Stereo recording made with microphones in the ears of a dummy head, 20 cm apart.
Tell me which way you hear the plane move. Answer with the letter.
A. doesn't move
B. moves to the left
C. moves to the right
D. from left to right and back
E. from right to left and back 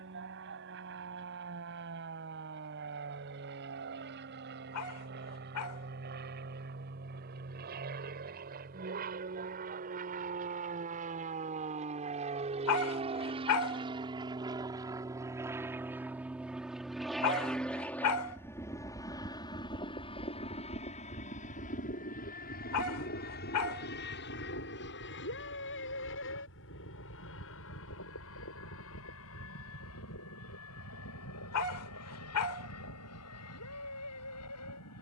B.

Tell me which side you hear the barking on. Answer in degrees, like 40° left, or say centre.
80° left.